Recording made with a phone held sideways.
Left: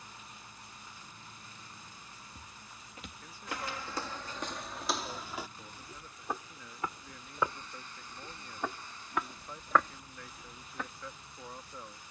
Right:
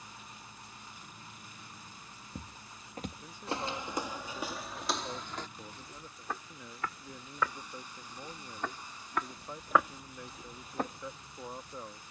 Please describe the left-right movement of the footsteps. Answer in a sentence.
In this clip you hear the footsteps go left and come back.